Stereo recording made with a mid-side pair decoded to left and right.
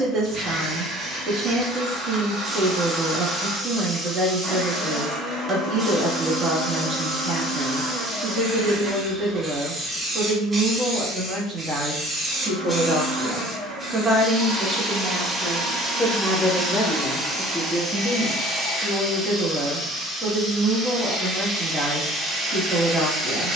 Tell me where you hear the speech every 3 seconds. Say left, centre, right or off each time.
right, right, right, right, right, centre, right, right.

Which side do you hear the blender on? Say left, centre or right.
right.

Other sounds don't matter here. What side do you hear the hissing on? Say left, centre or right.
right.